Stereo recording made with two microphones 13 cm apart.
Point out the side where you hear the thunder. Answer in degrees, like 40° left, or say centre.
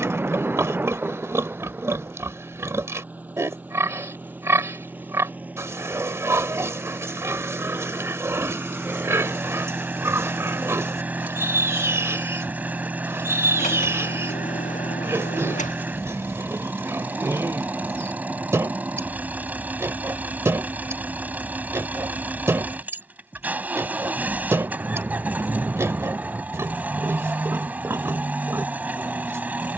10° right.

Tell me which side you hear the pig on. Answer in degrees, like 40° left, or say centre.
20° right.